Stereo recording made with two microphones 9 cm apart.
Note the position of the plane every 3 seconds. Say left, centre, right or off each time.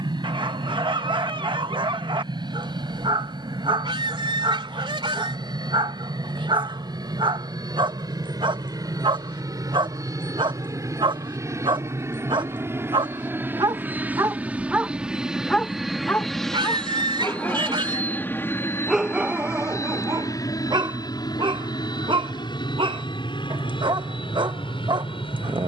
right, right, right, right, right, centre, left, left, left.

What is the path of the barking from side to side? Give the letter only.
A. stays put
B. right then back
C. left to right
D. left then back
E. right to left
D.